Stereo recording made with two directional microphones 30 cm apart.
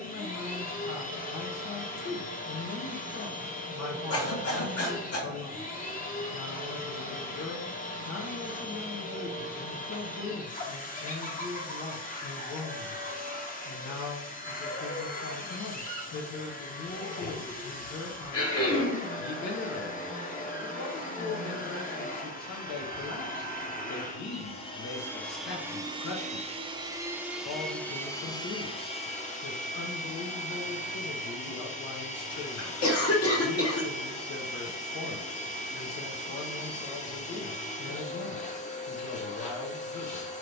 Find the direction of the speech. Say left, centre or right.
left.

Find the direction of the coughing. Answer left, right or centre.
left.